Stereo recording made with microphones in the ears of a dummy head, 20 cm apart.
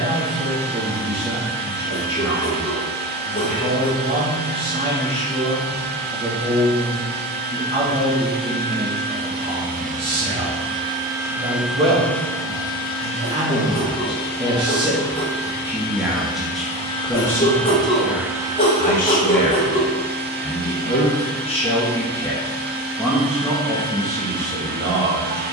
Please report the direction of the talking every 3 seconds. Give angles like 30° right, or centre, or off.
20° right, 20° right, 20° right, 20° right, 20° right, centre, 30° left, 10° left, 20° right.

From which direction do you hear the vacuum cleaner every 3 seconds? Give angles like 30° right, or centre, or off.
40° right, 40° right, 40° right, 20° right, 30° left, 30° left, 30° right, 40° right, 40° right.